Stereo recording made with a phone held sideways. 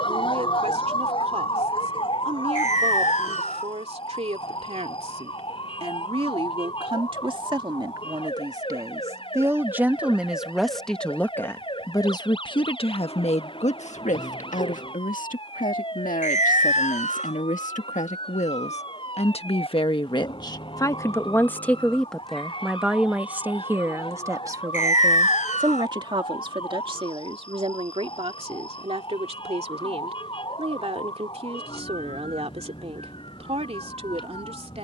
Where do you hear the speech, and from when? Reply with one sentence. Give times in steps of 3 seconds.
You can hear the speech on the right from 0 s, in the centre from 9 s, on the left from 12 s, in the centre from 21 s and on the right from 24 s.